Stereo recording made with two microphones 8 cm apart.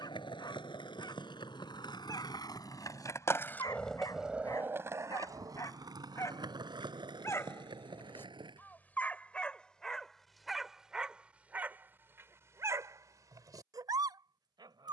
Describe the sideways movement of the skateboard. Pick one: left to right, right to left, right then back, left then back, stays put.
left to right.